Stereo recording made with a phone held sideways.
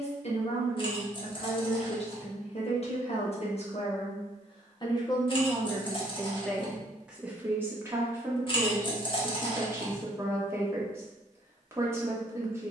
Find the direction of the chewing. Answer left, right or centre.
left.